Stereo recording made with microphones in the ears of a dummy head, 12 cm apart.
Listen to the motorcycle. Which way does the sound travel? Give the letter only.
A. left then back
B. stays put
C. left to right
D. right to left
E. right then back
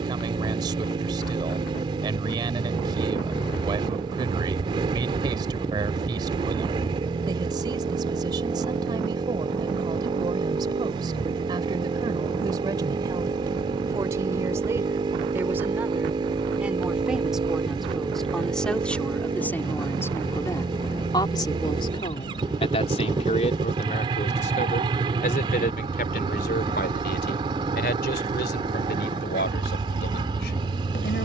B.